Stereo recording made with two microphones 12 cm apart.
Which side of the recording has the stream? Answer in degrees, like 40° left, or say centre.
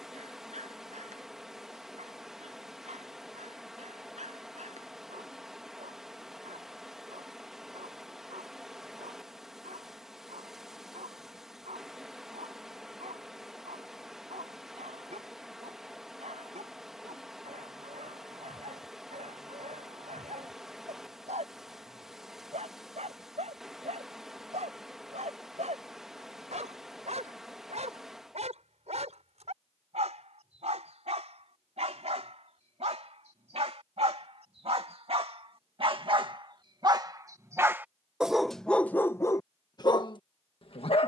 centre.